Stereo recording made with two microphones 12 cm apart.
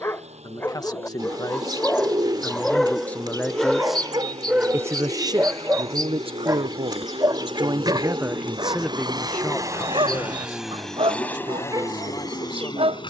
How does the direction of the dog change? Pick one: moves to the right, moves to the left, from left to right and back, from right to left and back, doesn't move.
moves to the right.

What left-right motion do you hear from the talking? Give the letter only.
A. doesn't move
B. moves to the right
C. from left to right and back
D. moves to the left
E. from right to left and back
C.